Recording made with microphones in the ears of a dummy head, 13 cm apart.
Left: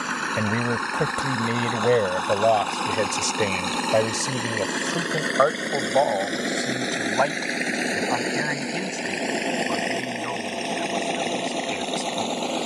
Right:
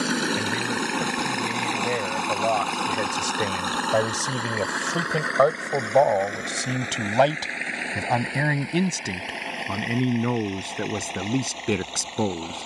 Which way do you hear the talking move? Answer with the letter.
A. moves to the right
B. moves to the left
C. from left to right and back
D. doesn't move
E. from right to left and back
A.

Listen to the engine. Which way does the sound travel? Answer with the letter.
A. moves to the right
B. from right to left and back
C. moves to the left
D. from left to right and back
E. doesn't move
C.